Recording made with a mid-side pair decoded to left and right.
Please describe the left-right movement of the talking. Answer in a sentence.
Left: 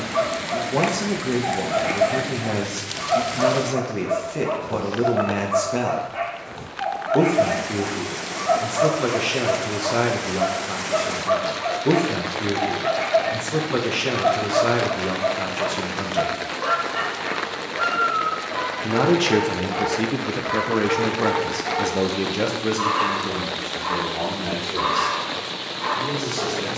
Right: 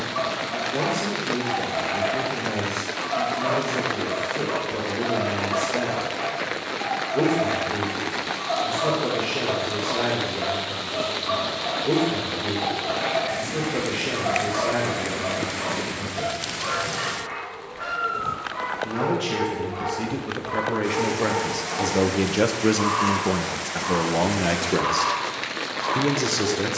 In this clip you hear the talking move from left to right.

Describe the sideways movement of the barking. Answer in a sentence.
In this clip you hear the barking stay put.